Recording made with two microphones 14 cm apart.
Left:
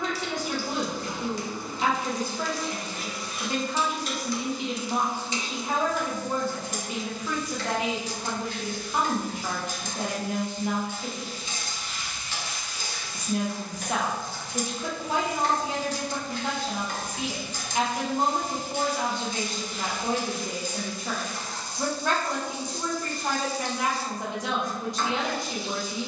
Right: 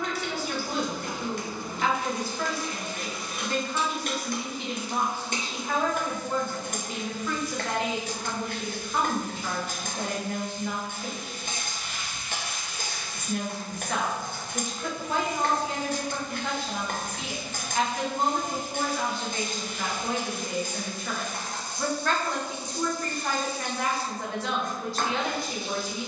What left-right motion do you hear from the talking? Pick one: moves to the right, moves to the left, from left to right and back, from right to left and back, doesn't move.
doesn't move.